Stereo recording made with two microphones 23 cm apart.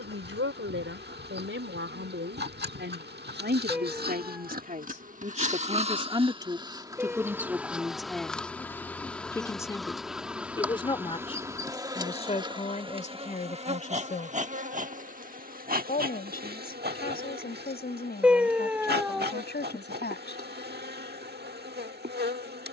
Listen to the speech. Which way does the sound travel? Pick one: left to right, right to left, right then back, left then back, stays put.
right to left.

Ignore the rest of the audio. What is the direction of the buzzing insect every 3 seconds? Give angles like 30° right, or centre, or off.
50° right, 40° right, 10° right, 10° right, 30° right, 50° right, 50° right, 50° right.